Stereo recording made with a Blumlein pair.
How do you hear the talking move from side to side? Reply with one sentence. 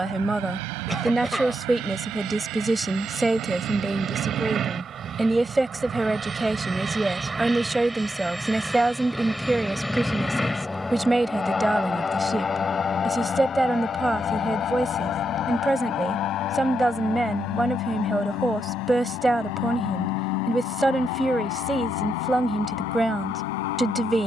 In this clip you hear the talking stay in one place.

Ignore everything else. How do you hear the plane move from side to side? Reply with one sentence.
In this clip you hear the plane move to the left.